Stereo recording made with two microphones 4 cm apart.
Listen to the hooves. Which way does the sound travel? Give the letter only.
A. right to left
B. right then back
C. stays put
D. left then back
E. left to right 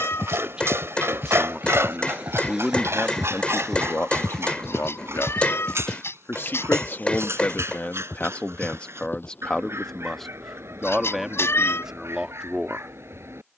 A.